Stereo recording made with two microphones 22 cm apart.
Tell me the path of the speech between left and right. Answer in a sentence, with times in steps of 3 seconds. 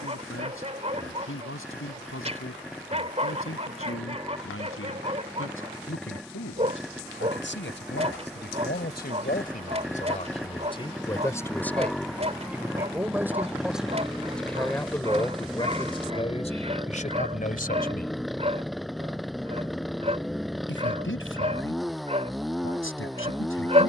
You can hear the speech on the left from 0 s, in the centre from 12 s and on the left from 15 s.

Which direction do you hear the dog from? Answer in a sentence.
In this clip you hear the dog on the right.